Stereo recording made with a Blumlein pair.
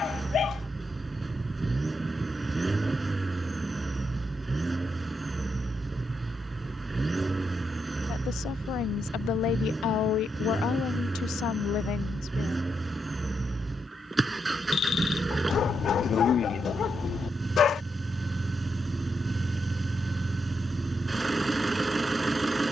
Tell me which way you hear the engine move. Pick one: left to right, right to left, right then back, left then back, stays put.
stays put.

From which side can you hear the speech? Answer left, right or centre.
left.